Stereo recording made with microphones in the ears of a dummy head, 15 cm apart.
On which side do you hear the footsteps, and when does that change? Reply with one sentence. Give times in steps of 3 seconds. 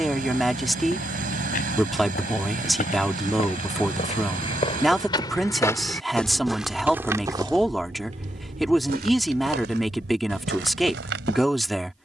In this clip you hear the footsteps on the left from 0 s and on the right from 6 s.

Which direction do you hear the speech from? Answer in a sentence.
In this clip you hear the speech in the centre.